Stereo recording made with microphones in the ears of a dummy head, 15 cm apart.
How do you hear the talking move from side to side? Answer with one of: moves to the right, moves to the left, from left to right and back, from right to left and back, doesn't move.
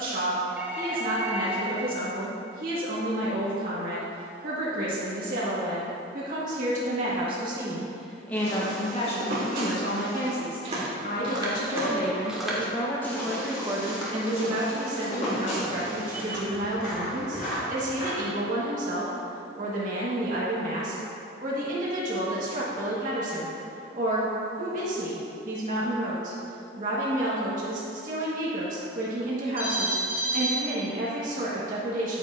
from right to left and back.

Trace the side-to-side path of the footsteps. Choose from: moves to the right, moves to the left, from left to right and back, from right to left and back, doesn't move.
moves to the left.